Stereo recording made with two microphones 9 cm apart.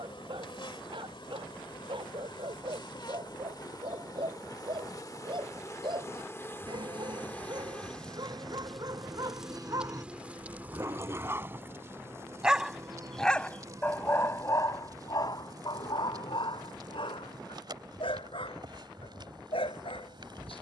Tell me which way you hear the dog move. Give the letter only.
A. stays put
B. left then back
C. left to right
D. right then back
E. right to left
E.